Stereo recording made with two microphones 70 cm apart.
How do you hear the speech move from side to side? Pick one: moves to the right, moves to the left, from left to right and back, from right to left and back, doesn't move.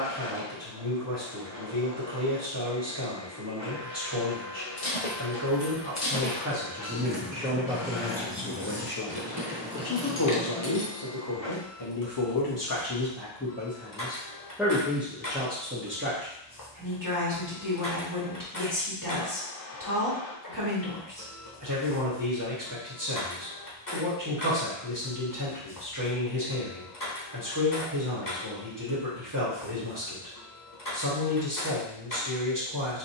from right to left and back.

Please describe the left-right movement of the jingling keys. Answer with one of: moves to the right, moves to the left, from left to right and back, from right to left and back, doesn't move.
from left to right and back.